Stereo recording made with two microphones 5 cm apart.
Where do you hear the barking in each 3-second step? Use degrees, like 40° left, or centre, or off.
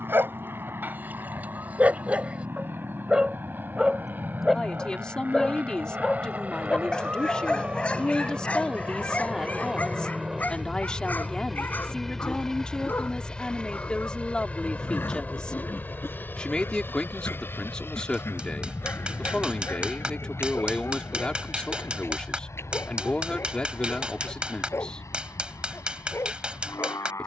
30° right, 10° right, 20° left, 30° left, 40° left, 50° left, 50° left, 50° left, 60° left.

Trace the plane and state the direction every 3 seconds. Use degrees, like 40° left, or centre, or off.
50° right, 40° right, 30° right, 10° right, 20° left, 40° left, 50° left, 60° left, 70° left.